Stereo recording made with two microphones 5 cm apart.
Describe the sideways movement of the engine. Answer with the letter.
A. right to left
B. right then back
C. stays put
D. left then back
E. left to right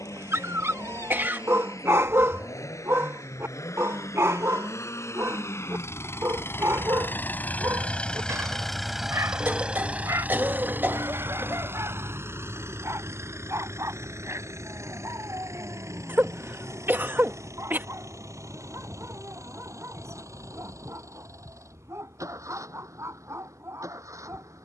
E.